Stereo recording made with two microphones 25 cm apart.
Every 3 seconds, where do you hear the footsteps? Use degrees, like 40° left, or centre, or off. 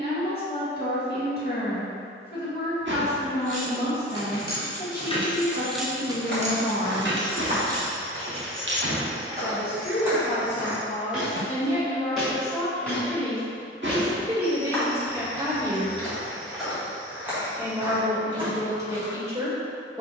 off, off, 30° right, 10° right, 10° left, centre, 30° right.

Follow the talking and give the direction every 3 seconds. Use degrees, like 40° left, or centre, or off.
40° left, 40° left, 40° left, 30° left, centre, 10° right, 10° right.